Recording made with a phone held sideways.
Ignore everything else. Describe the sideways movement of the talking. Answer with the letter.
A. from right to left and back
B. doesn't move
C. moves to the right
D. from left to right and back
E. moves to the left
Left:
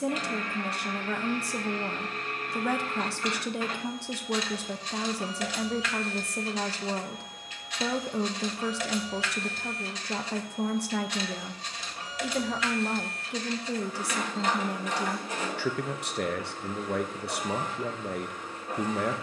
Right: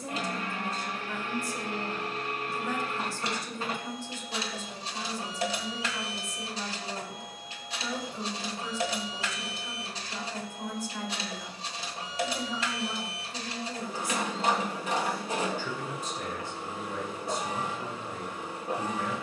B.